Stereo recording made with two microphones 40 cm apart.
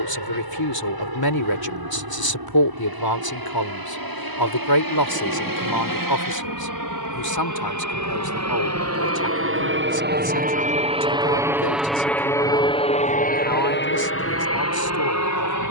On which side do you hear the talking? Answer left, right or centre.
left.